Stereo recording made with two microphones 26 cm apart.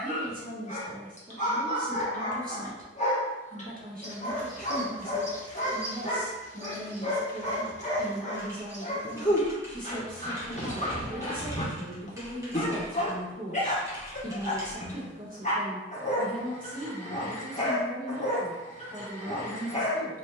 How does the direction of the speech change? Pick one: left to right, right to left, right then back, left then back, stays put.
stays put.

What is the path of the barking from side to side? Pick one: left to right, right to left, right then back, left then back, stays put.
stays put.